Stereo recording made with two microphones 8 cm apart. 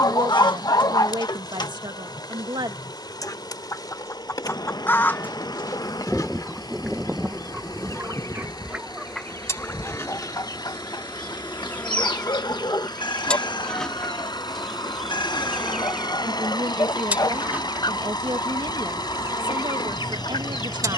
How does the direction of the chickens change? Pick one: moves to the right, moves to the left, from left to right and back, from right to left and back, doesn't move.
from left to right and back.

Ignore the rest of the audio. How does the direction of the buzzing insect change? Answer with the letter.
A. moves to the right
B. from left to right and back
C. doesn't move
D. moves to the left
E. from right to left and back
A.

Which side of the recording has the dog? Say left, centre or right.
left.